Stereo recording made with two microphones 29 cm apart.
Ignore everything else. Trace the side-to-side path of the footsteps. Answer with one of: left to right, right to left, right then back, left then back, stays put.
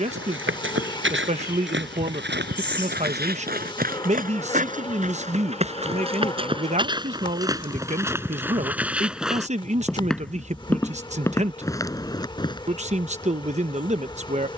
right to left.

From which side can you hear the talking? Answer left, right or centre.
right.